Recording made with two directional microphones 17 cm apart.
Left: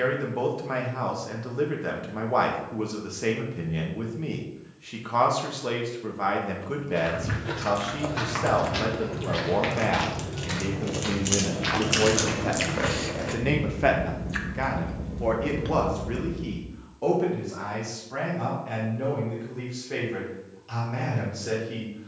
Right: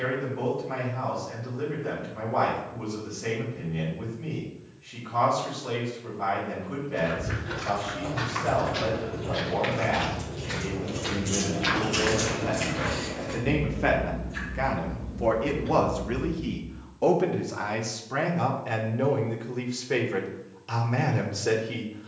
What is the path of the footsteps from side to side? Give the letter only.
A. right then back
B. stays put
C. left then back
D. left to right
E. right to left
D.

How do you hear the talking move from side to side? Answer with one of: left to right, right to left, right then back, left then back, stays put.
left to right.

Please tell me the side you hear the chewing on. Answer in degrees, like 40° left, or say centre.
70° left.